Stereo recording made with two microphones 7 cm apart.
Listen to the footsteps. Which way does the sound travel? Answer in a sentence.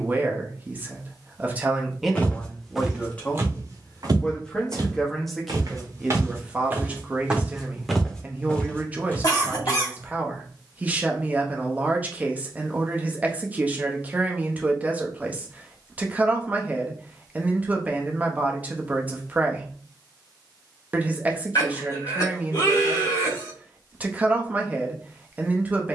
You can hear the footsteps move from left to right and back again.